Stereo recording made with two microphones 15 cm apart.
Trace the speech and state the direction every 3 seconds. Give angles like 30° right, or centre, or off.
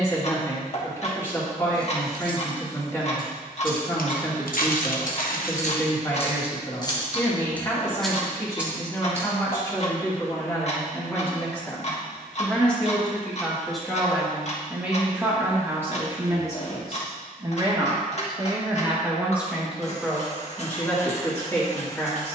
20° left, 20° left, 20° left, 20° left, centre, 20° right, 10° right, 20° left.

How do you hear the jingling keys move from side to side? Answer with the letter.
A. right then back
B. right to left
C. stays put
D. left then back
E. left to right
D.